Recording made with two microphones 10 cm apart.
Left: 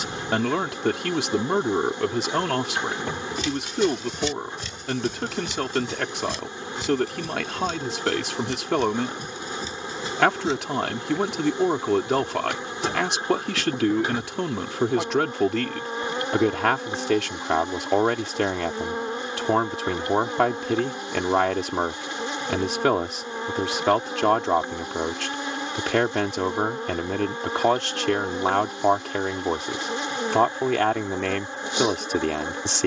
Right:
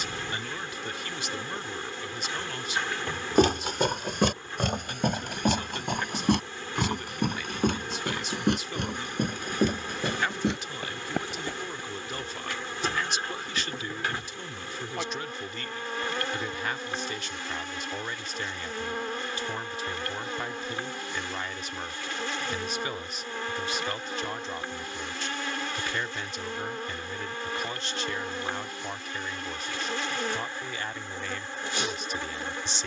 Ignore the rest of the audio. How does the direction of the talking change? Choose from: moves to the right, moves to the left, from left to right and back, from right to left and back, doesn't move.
doesn't move.